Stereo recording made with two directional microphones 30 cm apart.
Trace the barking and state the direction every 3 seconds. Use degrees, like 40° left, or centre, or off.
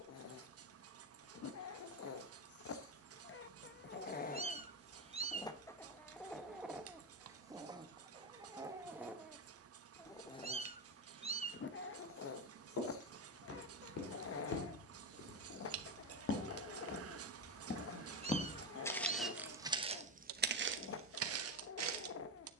50° left, 30° left, 10° right, 20° left, 50° left, 50° left, 50° left, 50° left.